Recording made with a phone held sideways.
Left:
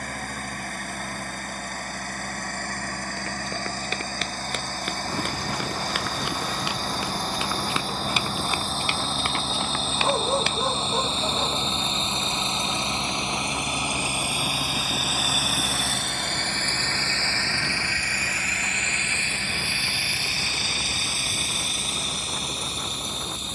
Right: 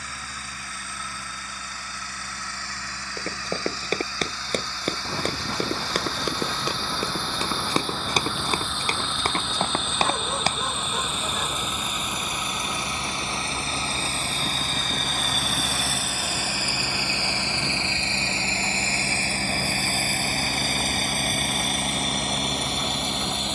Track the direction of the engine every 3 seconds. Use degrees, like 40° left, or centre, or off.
50° left, 50° left, 40° left, 30° left, 20° left, 10° right, 40° right, 60° right.